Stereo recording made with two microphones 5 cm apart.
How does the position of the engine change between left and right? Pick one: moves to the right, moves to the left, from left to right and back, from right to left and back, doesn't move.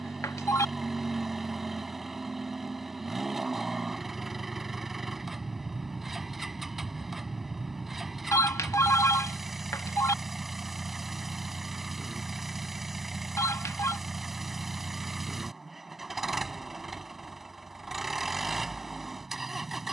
doesn't move.